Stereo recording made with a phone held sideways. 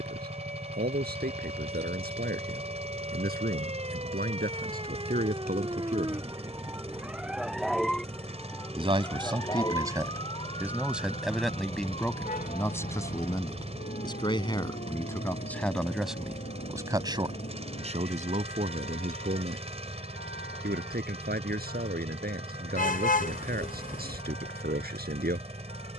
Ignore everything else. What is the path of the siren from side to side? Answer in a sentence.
You can hear the siren go from the right side to the left.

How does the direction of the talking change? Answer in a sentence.
In this clip you hear the talking go left and come back.